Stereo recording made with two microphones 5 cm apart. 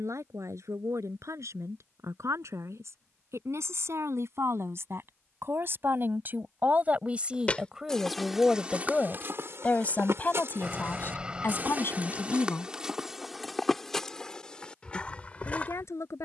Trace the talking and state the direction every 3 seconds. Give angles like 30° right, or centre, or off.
70° right, 60° right, 20° right, 40° left, 60° left, 70° left.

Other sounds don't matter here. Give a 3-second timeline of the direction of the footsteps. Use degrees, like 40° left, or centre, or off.
off, off, centre, 50° right, centre, 30° left.